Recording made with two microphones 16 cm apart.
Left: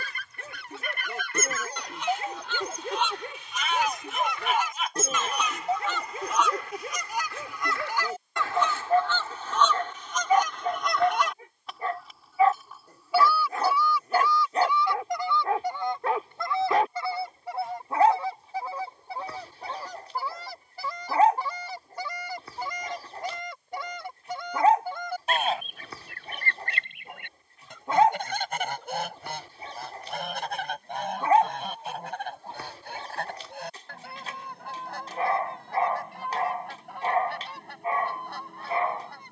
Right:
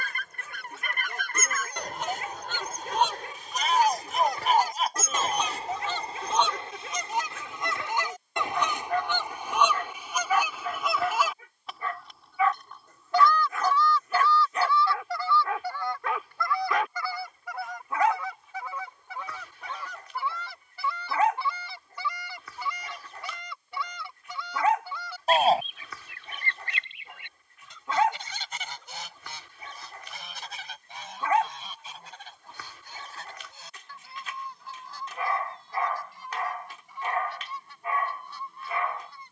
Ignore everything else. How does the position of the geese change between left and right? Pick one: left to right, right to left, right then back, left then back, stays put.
right to left.